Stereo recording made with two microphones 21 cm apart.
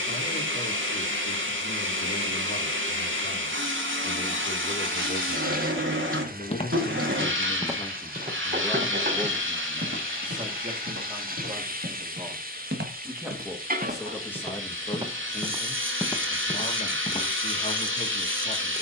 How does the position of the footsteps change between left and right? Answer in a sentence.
In this clip you hear the footsteps move from left to right and back again.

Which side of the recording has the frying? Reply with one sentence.
In this clip you hear the frying on the right.